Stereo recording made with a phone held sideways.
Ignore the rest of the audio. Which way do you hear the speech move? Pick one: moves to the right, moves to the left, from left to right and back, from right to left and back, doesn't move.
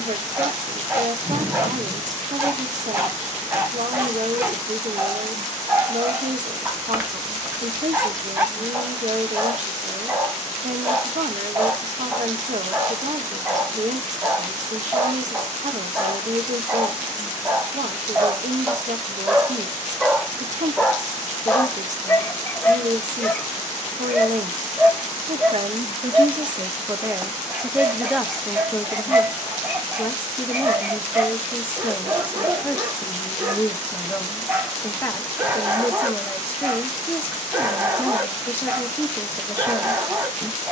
moves to the left.